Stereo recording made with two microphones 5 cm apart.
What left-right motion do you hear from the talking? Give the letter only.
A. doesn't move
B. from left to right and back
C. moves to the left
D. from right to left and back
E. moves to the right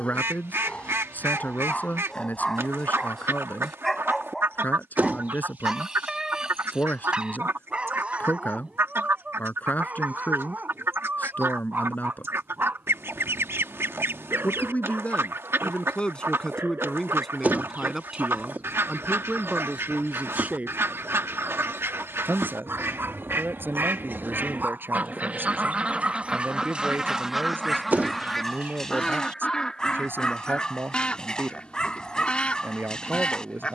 E.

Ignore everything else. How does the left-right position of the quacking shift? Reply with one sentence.
In this clip you hear the quacking go from the right side to the left.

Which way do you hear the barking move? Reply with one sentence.
In this clip you hear the barking move from left to right and back again.